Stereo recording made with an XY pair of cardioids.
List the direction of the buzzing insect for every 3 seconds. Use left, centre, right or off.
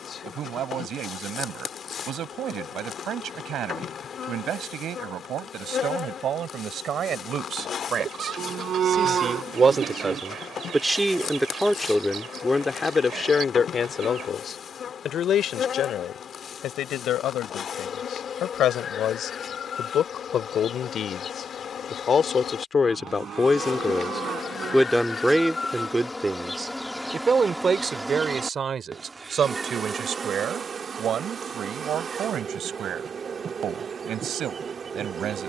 left, left, left, left, left, left, left, left, left, centre, right, right.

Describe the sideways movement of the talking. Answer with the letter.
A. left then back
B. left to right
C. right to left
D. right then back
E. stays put
A.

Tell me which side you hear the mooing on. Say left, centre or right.
right.